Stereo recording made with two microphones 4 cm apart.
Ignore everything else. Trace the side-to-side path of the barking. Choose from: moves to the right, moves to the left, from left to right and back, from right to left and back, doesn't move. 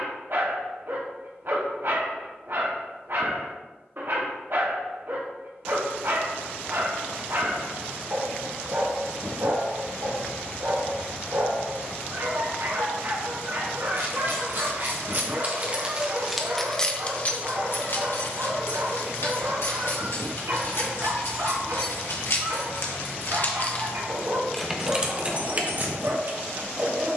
doesn't move.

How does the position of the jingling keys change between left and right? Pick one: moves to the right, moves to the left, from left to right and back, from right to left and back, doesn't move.
from right to left and back.